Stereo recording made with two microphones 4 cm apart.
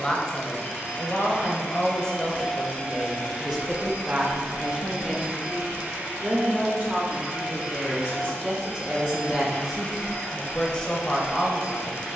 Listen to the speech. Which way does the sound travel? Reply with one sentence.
You can hear the speech move from left to right and back again.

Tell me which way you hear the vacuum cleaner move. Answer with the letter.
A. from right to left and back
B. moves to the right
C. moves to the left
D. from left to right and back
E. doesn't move
D.